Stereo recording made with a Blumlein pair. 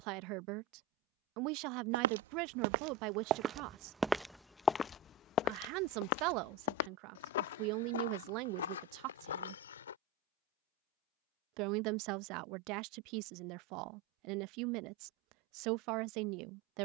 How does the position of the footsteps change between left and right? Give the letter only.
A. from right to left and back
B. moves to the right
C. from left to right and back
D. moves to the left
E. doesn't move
D.